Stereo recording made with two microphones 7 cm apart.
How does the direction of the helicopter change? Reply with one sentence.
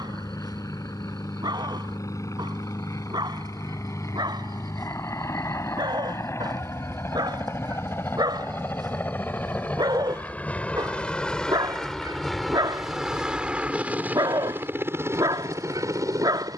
You can hear the helicopter move from left to right.